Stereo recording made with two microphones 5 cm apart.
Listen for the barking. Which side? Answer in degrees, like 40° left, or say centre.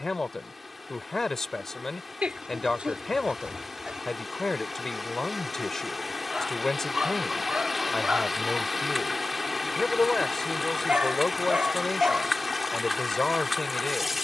20° right.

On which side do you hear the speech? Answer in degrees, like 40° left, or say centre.
10° left.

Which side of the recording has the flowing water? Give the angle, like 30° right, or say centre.
centre.